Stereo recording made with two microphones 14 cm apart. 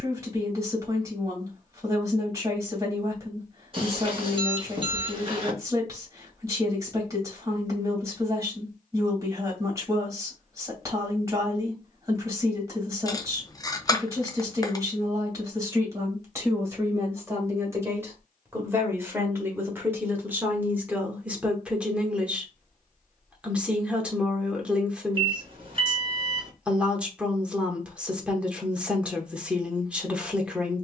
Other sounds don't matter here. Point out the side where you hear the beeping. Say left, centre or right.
right.